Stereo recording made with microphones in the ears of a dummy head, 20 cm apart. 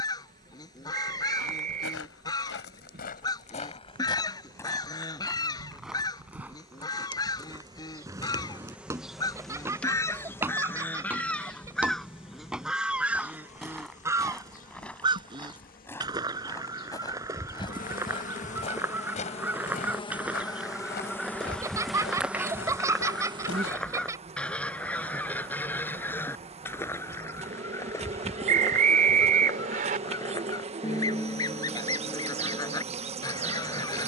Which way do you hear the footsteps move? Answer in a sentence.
You can hear the footsteps go right and come back.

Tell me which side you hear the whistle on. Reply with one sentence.
You can hear the whistle on the right.